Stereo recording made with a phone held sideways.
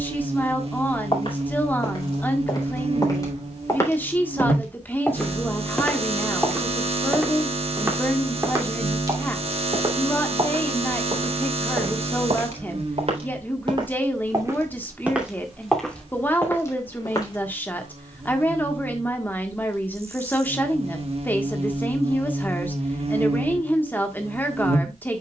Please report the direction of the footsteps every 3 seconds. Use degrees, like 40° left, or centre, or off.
40° left, 20° left, 10° right, 40° right, 40° right, 20° left, off, off, off.